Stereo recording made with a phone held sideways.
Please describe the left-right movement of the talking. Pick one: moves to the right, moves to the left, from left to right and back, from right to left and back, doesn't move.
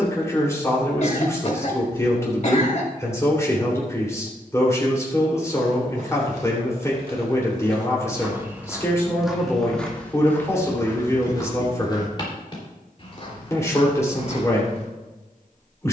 doesn't move.